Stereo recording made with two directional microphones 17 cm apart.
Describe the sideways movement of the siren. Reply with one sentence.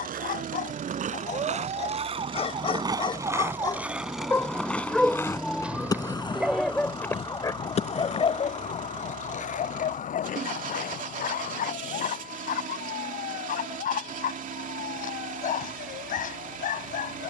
You can hear the siren travel towards the left.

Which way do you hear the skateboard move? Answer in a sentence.
You can hear the skateboard go from the right side to the left.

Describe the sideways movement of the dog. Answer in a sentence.
You can hear the dog move from left to right and back again.